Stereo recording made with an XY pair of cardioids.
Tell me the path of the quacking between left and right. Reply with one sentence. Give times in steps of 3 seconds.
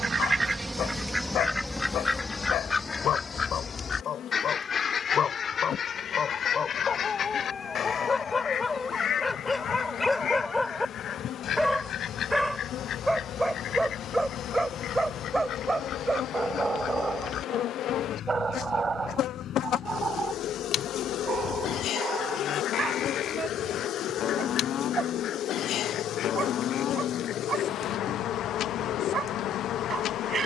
You can hear the quacking in the centre from 0 s and on the left from 3 s.